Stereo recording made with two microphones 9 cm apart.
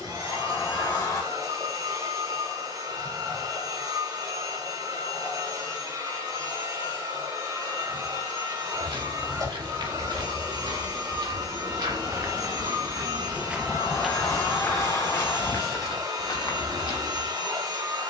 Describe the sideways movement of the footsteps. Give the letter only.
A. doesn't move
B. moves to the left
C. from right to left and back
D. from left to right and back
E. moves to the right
B.